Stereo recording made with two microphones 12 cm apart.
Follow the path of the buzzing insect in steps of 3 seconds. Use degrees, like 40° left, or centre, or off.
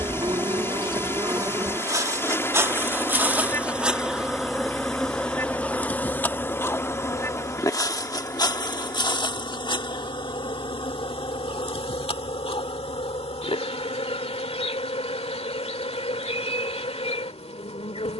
30° right, centre, 30° left, 40° left, 60° left, 60° left.